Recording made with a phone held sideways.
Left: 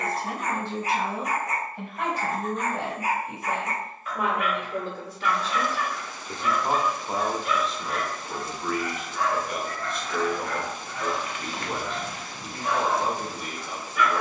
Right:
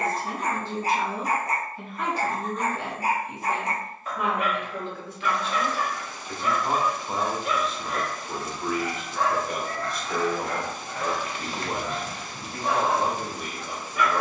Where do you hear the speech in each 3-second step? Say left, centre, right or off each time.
left, left, centre, right, right.